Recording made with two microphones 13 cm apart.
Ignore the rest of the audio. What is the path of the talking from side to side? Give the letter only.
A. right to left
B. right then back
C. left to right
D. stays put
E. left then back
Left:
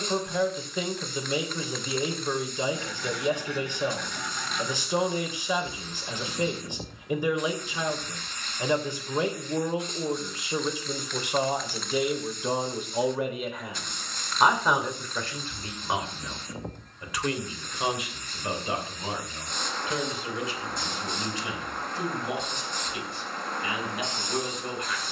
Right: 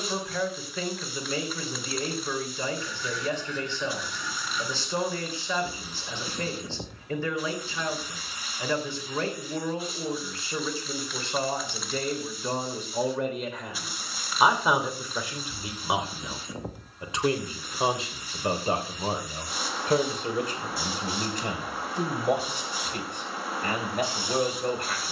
C.